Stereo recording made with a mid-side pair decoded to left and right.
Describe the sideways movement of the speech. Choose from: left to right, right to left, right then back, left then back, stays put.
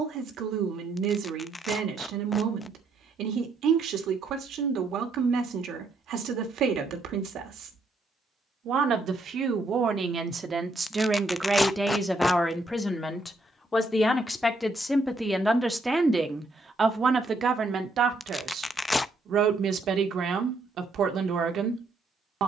left then back.